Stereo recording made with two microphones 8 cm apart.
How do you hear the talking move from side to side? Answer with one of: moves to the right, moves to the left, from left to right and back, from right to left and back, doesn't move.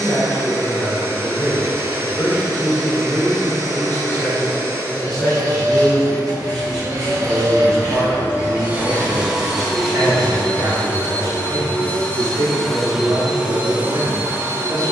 moves to the right.